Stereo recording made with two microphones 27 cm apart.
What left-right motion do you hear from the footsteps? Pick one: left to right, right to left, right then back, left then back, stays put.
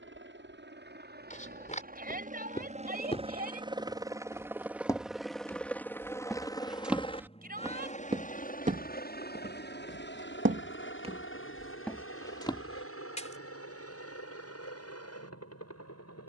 right then back.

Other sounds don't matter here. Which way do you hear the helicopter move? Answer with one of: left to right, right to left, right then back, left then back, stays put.
right to left.